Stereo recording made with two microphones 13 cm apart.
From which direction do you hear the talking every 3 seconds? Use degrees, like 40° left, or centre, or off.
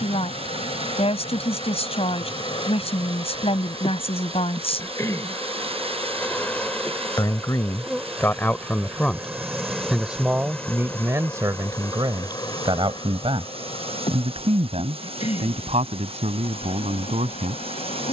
50° left, 50° left, 20° left, 20° right, 50° right, 60° right.